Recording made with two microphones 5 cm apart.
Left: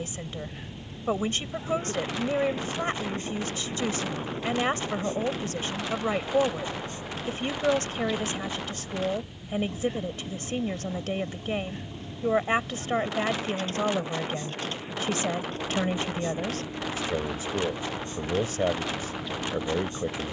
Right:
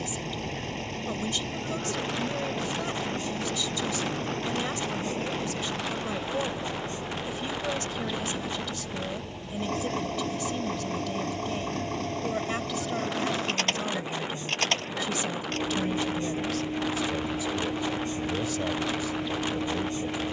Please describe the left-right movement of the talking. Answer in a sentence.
In this clip you hear the talking stay put.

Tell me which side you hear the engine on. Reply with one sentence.
In this clip you hear the engine on the right.